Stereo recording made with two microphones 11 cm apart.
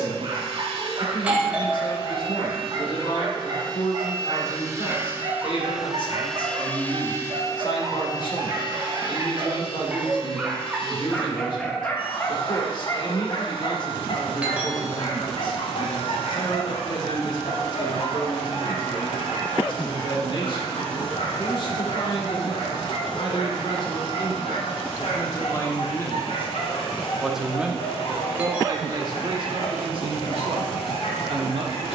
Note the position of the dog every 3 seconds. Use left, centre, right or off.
right, right, right, centre, left, left, left, left, left, left, left.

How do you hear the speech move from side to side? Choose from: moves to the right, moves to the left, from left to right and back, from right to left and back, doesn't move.
moves to the right.